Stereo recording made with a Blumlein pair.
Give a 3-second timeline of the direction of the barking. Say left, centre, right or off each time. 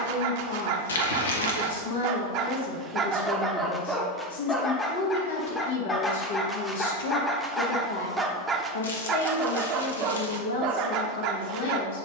right, centre, centre, right.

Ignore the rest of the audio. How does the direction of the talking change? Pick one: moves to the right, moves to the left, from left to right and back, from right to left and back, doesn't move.
doesn't move.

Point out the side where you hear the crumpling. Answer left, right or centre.
left.